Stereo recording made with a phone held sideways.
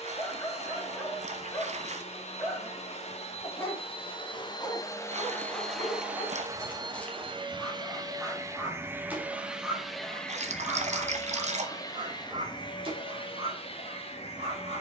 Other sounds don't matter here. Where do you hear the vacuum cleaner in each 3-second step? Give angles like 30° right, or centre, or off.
50° left, 30° left, 30° right, 10° left, 40° left.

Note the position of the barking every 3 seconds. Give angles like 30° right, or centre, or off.
20° left, 20° left, centre, 20° right, 50° right.